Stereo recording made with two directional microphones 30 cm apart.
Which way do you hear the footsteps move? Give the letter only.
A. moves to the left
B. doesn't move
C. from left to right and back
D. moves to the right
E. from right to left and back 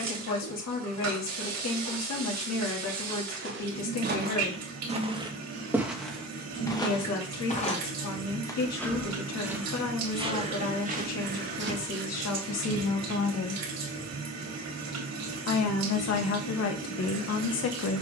E.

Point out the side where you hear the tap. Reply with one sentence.
In this clip you hear the tap on the right.